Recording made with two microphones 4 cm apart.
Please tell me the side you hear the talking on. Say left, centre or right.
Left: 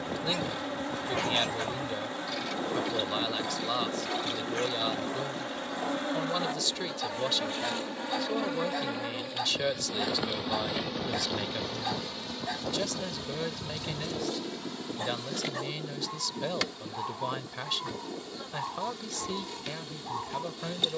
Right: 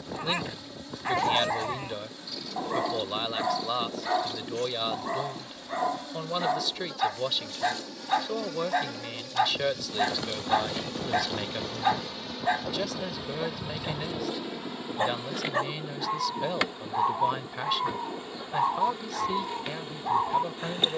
centre.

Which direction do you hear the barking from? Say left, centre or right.
right.